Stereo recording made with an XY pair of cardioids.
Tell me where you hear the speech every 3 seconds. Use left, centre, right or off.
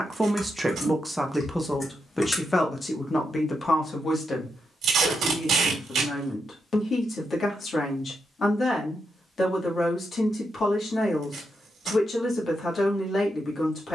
centre, left, left, left, left.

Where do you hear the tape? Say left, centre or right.
right.